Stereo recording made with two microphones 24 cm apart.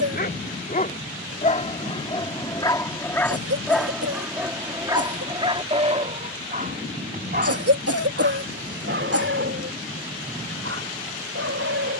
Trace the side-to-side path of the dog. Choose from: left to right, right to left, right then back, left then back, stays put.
left to right.